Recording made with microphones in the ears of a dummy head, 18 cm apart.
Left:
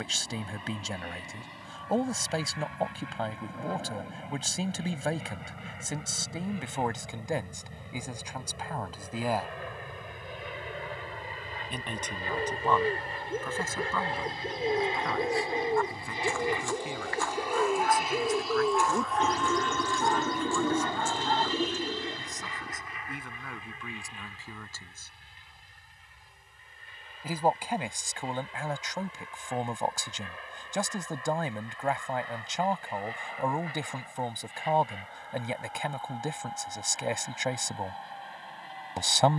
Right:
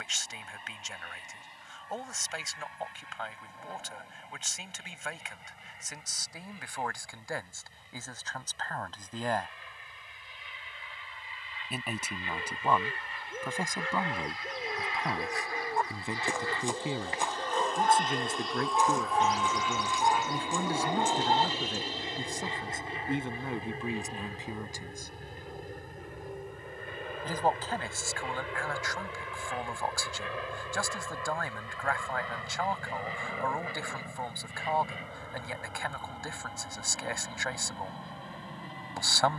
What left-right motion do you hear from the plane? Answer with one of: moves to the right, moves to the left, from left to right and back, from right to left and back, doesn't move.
moves to the right.